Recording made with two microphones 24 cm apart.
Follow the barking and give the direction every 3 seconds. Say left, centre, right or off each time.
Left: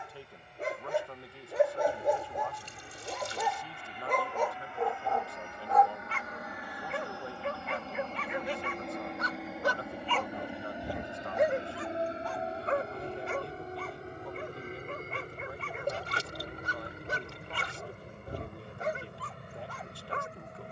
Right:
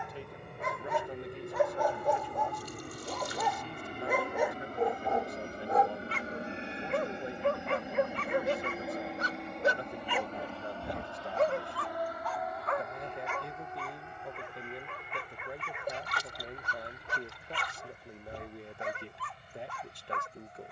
left, centre, right, centre, left, left, left.